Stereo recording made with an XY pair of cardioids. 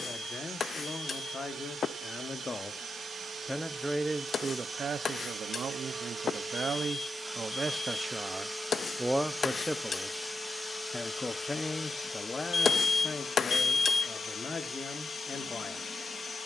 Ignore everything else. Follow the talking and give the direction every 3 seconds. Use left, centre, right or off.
left, right, right, centre, left, left.